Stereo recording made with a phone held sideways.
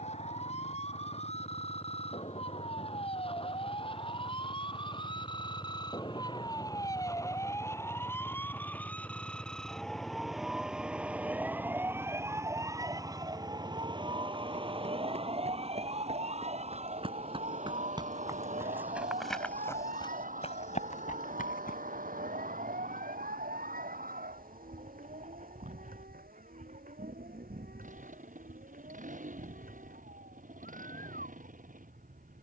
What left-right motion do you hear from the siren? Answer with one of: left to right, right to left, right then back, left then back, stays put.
left to right.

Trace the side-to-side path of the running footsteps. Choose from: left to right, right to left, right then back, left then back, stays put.
right to left.